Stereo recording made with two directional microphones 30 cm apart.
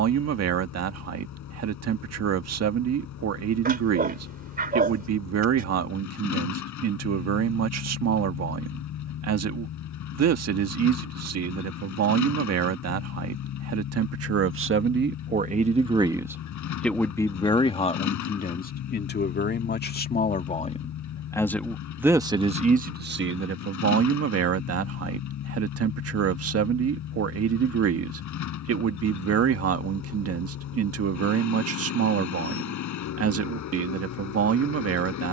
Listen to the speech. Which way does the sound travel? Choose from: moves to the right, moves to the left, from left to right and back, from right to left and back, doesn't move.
from right to left and back.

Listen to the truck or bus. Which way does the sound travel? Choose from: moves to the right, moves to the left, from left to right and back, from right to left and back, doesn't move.
doesn't move.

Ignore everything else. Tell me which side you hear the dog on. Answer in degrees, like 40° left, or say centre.
30° right.